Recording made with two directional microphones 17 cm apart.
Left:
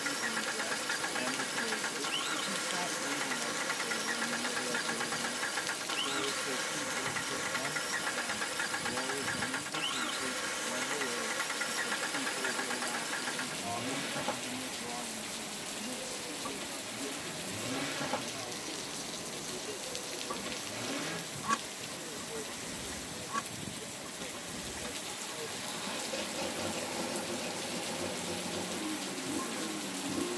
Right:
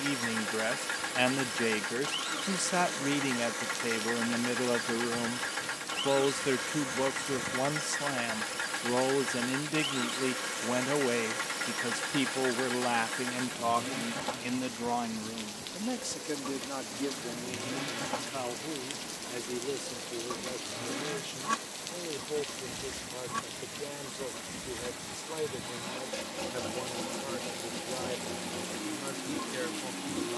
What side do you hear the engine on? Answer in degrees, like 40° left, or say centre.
centre.